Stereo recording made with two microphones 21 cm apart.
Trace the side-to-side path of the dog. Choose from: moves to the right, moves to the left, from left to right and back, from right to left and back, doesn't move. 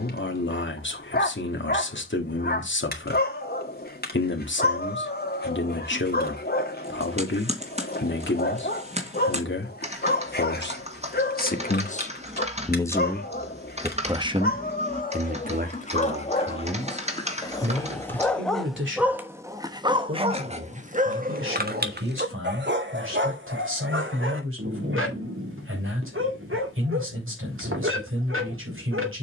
moves to the right.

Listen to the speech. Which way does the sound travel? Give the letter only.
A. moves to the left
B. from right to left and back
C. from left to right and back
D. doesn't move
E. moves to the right
E.